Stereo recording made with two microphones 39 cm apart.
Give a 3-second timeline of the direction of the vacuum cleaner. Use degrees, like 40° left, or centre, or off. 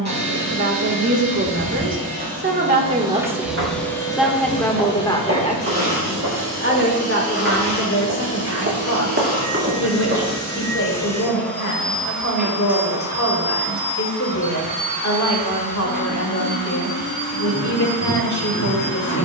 30° right, 20° left, 30° left, 10° left, 10° right, 30° right, 40° right.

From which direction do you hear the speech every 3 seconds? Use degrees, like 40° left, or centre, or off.
40° right, centre, 40° left, 50° left, 50° left, 50° left, 50° left.